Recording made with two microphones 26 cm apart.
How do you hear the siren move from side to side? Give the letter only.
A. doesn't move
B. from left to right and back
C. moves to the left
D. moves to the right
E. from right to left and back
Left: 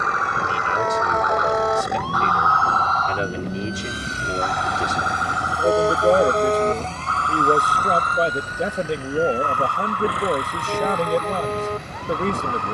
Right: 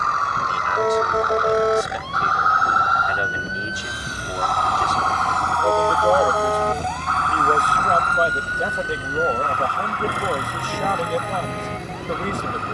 C.